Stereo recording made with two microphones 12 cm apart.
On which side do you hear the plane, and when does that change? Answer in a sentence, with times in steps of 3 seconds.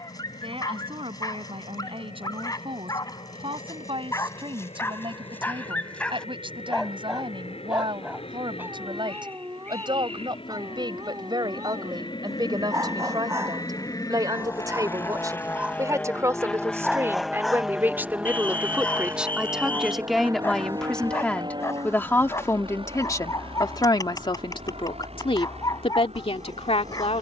You can hear the plane on the left from 0 s, in the centre from 15 s and on the right from 18 s.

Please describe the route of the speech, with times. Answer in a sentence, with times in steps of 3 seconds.
In this clip you hear the speech on the right from 0 s, in the centre from 18 s and on the left from 21 s.